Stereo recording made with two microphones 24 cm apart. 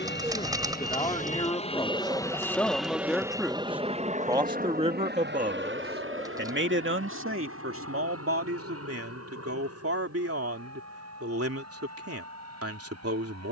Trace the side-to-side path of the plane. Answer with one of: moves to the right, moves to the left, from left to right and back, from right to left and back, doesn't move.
moves to the right.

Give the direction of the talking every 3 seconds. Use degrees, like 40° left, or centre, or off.
20° left, 20° right, 60° right, 70° right, 70° right.